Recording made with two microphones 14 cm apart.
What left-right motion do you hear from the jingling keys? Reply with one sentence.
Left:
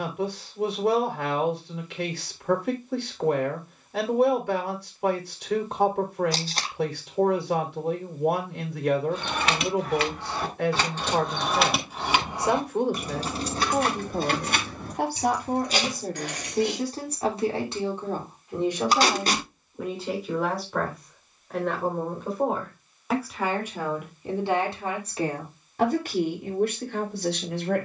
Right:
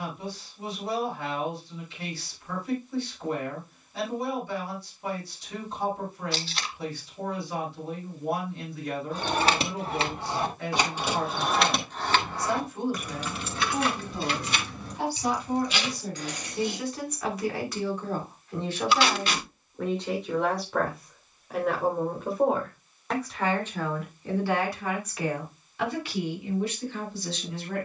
You can hear the jingling keys move to the left.